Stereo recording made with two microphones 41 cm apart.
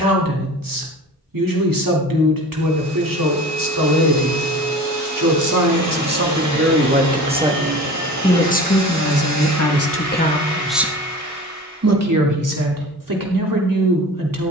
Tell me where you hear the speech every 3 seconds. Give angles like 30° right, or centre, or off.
50° right, 50° right, 10° right, 10° left, 50° right.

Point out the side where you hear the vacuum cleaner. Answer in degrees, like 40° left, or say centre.
50° right.